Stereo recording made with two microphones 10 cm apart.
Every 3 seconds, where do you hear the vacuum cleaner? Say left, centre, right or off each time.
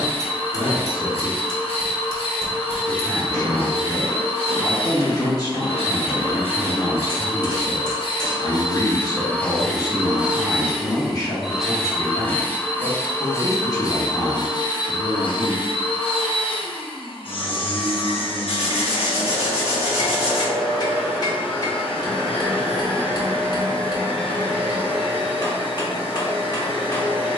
left, left, left, centre, left, left, left, left, left.